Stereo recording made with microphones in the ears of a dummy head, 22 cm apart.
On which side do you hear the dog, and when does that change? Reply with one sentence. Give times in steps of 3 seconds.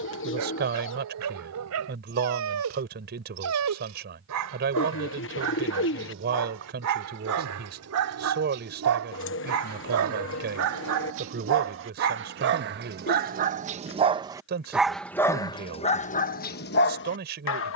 In this clip you hear the dog on the right from 0 s and on the left from 15 s.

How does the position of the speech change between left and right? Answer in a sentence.
You can hear the speech stay in one place.